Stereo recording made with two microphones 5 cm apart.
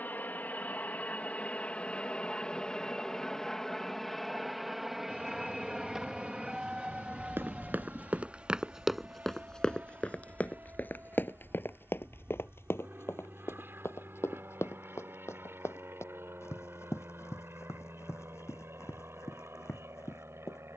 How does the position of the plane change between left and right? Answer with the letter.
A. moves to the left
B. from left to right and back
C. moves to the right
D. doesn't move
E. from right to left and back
C.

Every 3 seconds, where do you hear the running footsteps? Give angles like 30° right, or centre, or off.
off, off, 20° right, 30° left, 60° left, 70° left, 70° left.